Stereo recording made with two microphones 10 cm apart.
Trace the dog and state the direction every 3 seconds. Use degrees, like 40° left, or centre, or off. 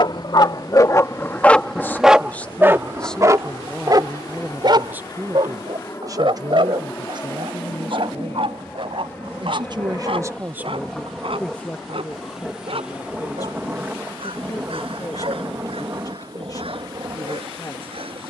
20° left, 40° right, 60° right, 70° right, 70° right, 70° right.